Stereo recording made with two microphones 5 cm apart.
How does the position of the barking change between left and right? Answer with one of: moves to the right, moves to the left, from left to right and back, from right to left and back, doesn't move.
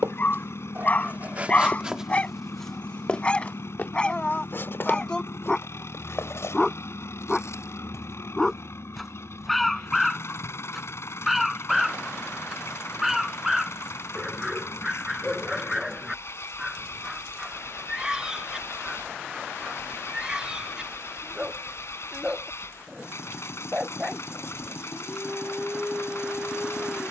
moves to the right.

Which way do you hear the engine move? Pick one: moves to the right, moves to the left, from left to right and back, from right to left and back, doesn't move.
doesn't move.